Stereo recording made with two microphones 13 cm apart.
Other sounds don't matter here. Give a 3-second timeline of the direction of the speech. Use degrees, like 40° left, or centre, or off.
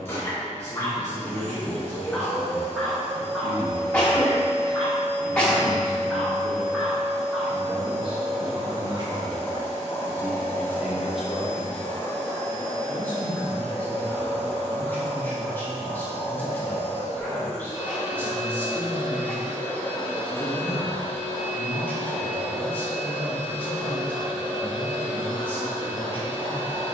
70° right, 70° right, 50° right, 10° right, 10° left, 10° left, 10° left, 10° left, 10° left.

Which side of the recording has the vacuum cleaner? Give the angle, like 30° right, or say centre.
20° left.